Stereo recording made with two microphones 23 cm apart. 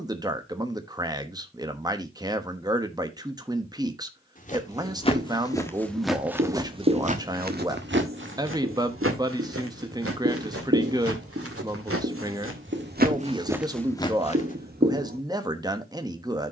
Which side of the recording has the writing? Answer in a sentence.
You can hear the writing on the right.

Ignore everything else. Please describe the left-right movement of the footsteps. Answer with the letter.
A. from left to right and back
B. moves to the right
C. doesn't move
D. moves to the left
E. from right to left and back
A.